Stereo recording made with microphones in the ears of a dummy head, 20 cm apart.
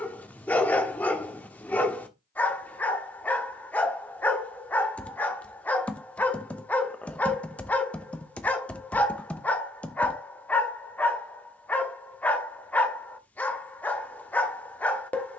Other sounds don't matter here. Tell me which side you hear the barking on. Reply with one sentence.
In this clip you hear the barking in the centre.